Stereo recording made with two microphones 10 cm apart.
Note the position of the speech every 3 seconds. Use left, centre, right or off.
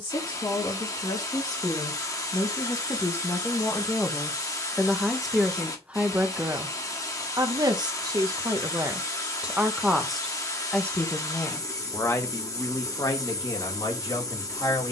left, centre, right, centre, left.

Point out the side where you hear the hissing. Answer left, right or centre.
left.